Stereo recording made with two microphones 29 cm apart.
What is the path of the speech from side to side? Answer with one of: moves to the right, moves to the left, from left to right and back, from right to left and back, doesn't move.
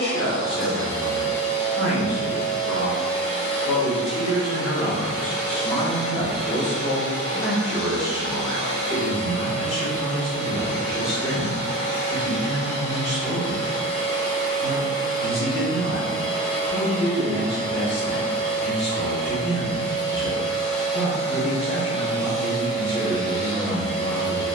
from left to right and back.